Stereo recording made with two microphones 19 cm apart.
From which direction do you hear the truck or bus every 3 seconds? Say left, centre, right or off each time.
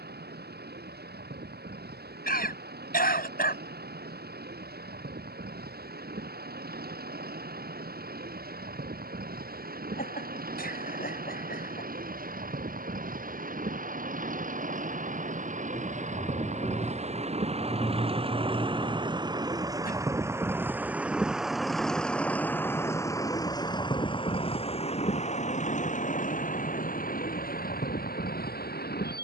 right, right, right, right, right, right, right, centre, left, left.